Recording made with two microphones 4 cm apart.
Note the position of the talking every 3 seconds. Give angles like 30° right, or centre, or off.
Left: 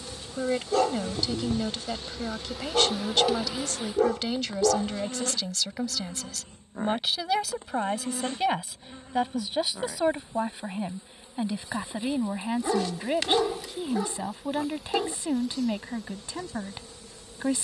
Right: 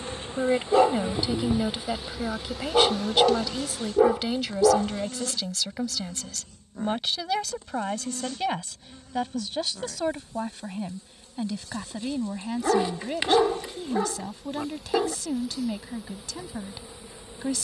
20° right, 10° right, 10° left, 20° left, 20° left, 20° left.